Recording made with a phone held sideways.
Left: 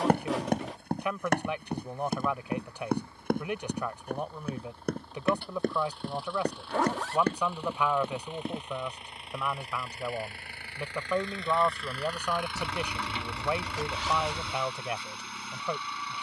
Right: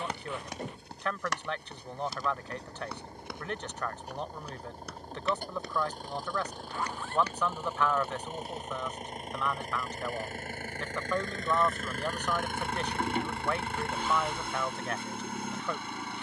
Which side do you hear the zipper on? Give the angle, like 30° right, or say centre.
80° left.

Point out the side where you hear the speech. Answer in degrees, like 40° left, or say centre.
10° left.